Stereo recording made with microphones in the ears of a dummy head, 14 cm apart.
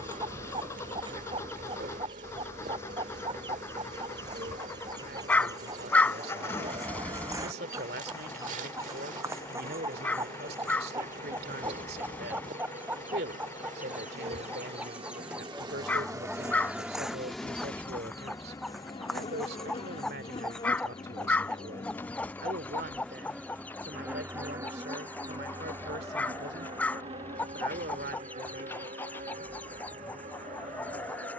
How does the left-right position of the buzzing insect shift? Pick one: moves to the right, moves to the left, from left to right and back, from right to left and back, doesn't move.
from right to left and back.